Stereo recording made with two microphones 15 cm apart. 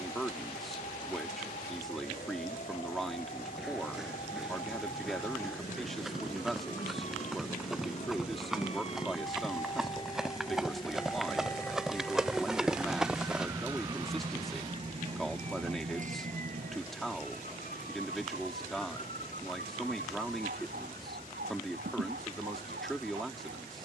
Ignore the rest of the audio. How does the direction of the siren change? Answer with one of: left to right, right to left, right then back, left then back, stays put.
left to right.